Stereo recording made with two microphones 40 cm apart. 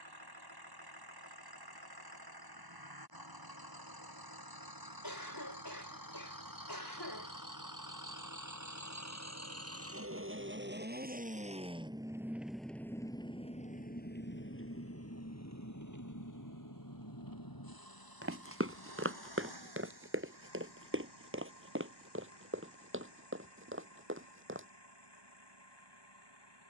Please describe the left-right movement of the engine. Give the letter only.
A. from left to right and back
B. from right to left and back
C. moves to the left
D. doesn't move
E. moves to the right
C.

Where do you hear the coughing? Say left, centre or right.
left.